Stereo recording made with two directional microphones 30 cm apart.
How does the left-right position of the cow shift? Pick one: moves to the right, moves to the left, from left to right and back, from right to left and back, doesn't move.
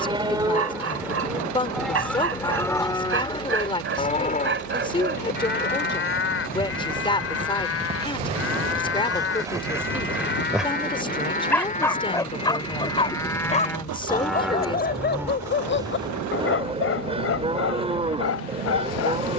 from right to left and back.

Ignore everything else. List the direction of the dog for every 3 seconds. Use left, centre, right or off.
right, right, right, centre, left, left, left.